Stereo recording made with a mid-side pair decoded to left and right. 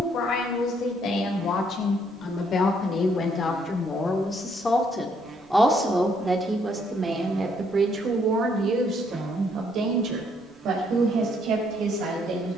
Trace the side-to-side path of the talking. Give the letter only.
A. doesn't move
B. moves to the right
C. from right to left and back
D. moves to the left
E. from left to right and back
B.